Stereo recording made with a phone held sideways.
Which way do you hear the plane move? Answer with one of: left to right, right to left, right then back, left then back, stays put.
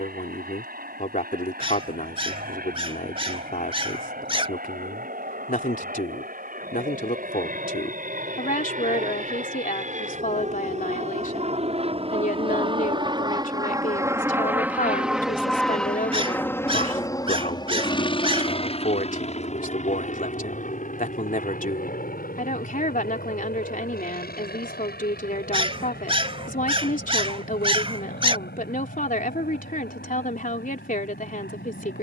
right to left.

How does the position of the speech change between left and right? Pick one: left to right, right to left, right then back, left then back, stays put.
stays put.